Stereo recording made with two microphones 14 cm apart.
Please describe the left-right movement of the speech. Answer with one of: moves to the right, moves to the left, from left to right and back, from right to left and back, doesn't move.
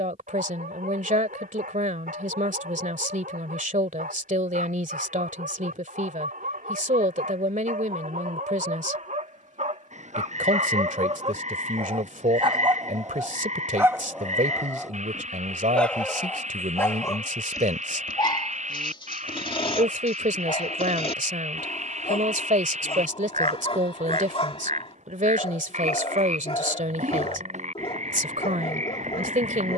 doesn't move.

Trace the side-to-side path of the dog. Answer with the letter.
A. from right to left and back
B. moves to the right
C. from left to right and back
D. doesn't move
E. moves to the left
E.